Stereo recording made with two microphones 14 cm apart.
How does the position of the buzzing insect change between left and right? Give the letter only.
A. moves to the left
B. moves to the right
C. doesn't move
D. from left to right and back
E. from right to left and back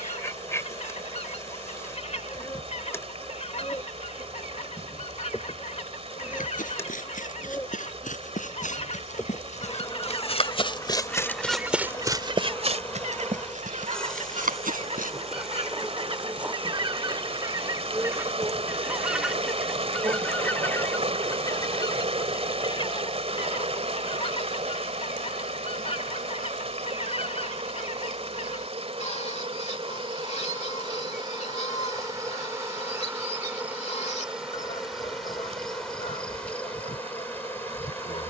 D.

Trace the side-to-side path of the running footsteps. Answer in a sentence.
In this clip you hear the running footsteps move to the right.